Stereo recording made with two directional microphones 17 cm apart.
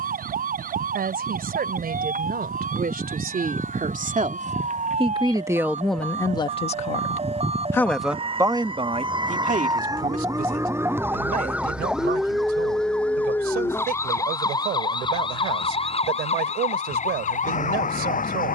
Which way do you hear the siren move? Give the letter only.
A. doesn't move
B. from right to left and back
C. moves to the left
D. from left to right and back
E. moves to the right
C.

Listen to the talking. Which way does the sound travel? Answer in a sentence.
In this clip you hear the talking go left and come back.